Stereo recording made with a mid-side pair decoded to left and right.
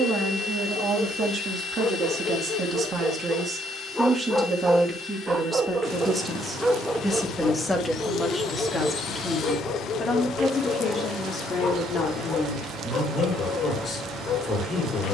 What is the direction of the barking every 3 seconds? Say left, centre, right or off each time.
left, centre, centre, left, left.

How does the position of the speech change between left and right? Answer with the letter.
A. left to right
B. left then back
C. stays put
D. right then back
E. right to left
E.